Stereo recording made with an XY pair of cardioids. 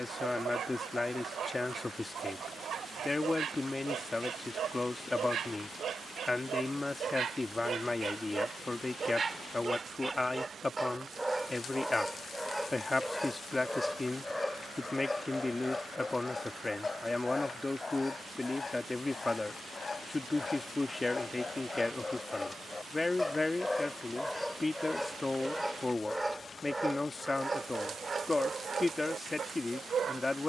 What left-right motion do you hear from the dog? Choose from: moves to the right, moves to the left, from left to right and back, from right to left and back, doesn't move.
from right to left and back.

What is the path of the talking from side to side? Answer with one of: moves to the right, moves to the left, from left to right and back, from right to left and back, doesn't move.
doesn't move.